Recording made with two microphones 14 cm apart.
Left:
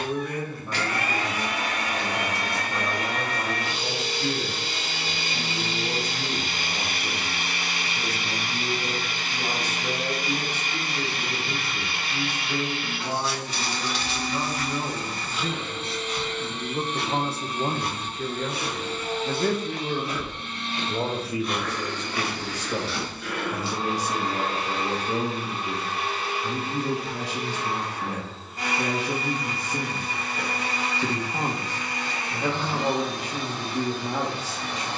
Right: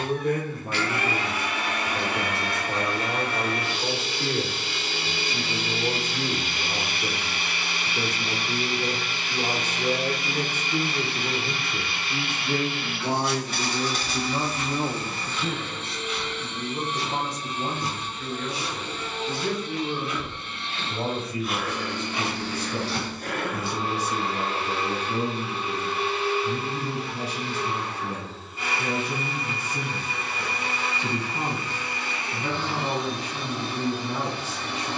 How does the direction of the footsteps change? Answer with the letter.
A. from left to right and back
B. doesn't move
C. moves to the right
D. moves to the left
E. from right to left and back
E.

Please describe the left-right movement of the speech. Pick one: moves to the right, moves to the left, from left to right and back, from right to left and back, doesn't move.
moves to the left.